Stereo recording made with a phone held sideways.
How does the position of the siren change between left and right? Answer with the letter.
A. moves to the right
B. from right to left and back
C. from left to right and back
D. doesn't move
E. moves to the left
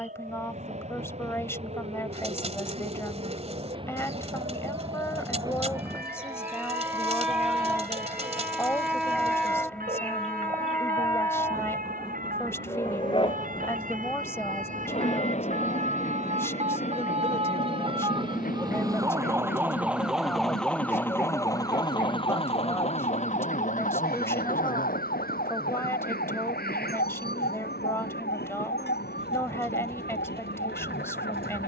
E.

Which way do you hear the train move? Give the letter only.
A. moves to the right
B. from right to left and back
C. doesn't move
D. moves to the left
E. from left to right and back
D.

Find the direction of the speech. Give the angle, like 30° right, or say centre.
20° left.